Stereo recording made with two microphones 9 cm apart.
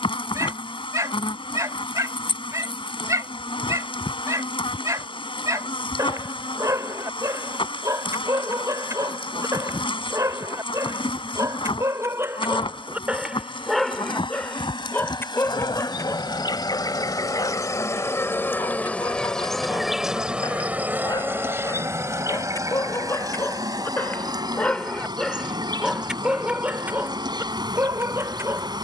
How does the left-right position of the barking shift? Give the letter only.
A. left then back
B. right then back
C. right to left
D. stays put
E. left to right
A.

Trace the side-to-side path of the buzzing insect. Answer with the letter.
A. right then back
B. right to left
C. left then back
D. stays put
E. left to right
E.